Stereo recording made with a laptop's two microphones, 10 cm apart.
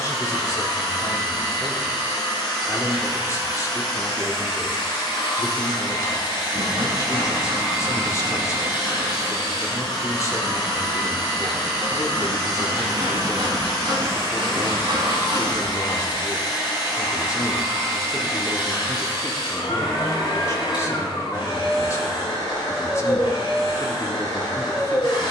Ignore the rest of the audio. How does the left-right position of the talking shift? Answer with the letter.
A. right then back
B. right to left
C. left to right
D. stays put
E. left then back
D.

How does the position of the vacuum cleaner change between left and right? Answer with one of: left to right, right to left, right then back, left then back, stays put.
stays put.